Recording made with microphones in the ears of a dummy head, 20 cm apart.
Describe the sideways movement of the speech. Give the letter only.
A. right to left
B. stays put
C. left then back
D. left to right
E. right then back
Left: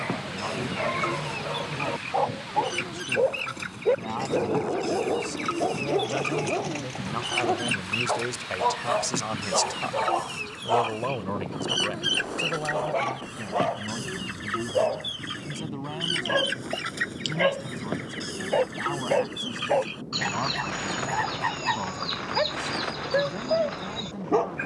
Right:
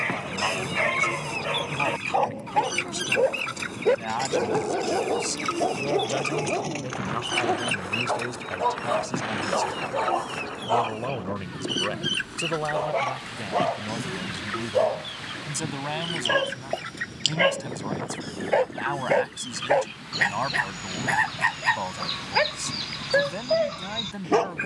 C.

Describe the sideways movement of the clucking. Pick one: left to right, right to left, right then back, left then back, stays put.
left then back.